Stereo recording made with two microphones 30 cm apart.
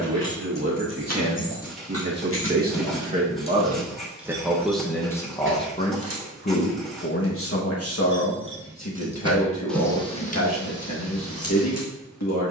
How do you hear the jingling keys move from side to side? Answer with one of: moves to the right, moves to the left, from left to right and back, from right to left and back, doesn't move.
from left to right and back.